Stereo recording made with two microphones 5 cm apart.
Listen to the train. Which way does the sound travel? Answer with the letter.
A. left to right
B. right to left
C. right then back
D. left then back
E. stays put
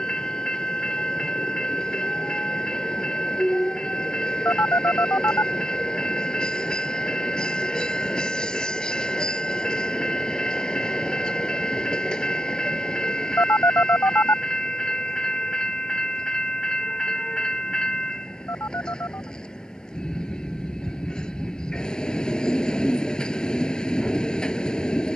E.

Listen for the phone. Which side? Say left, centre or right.
left.